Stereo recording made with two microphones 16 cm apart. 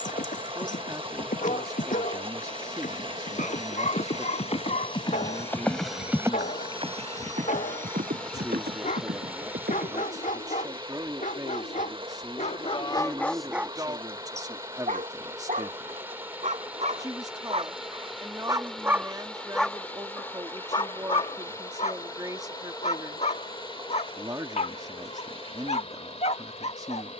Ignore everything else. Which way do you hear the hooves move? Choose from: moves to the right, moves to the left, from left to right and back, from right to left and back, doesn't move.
moves to the right.